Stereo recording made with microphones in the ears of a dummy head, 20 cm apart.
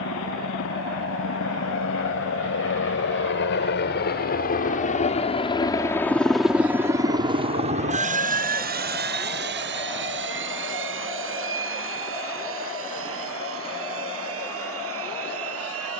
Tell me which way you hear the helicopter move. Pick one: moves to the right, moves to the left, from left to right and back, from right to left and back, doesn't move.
moves to the right.